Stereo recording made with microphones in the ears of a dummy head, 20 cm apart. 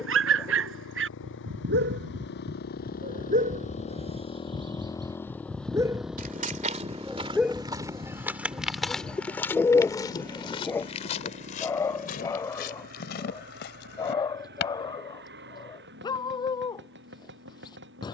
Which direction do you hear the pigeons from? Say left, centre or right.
centre.